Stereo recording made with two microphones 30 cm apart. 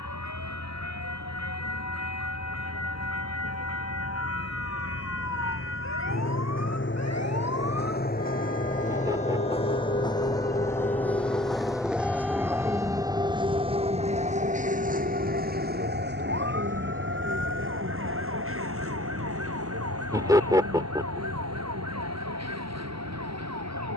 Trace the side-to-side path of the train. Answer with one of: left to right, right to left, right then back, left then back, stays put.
left to right.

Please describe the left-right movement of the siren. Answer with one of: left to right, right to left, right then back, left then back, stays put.
left to right.